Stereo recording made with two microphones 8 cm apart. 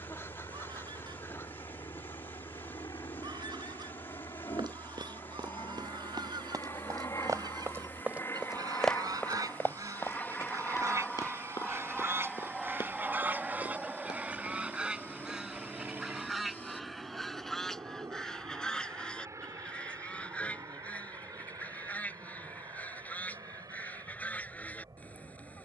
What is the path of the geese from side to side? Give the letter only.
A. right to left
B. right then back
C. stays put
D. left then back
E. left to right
A.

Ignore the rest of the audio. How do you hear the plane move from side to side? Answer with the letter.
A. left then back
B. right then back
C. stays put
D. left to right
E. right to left
D.